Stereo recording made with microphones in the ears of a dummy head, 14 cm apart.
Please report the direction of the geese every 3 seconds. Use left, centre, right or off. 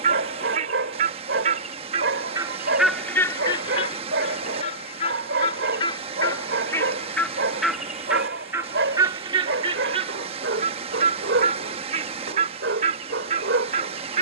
right, left, centre, right, right.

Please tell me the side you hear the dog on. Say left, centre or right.
right.